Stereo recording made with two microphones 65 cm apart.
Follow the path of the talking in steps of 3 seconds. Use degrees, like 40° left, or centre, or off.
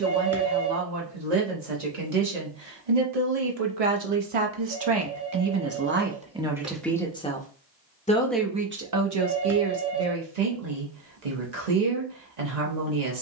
80° right, 50° right, centre, 70° right, 80° right.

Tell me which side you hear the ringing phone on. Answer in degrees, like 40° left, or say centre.
20° right.